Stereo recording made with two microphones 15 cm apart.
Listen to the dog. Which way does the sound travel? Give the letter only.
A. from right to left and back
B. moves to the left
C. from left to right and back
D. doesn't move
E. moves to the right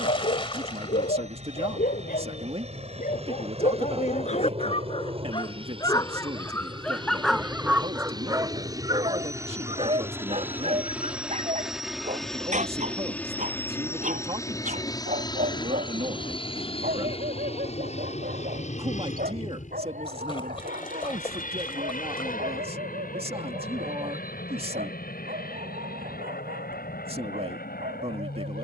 E.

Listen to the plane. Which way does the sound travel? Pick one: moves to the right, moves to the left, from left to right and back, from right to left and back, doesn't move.
moves to the left.